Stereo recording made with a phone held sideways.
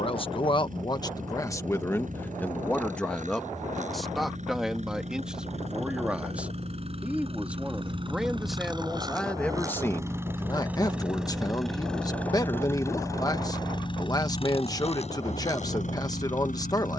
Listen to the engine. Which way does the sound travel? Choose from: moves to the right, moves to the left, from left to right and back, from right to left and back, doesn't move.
moves to the left.